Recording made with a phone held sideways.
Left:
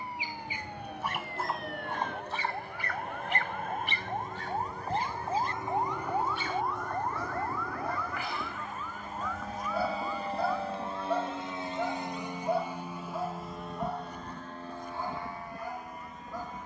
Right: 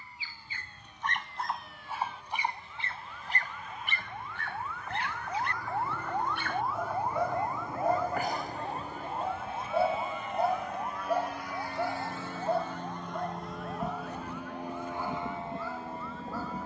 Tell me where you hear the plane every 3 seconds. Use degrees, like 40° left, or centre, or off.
70° left, 60° left, 50° left, 30° left, centre, 30° right.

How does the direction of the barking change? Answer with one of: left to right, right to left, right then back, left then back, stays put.
right then back.